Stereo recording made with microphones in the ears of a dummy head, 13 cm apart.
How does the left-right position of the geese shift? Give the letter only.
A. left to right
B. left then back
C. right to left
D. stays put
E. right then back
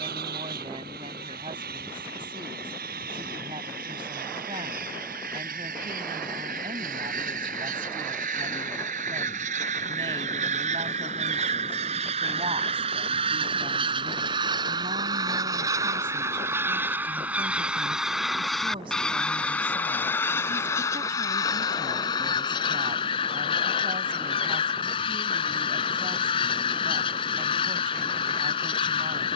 C.